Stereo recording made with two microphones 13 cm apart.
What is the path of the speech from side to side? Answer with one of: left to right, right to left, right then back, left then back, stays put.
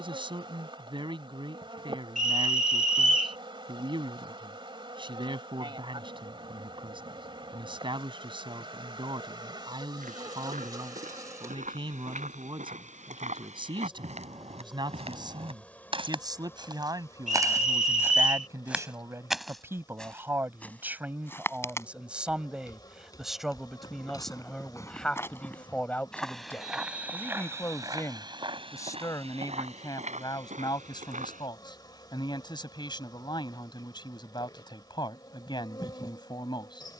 right to left.